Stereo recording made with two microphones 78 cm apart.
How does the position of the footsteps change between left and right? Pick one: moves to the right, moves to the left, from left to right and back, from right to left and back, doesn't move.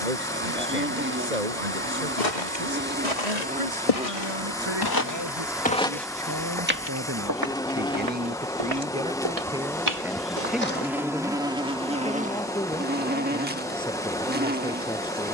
moves to the right.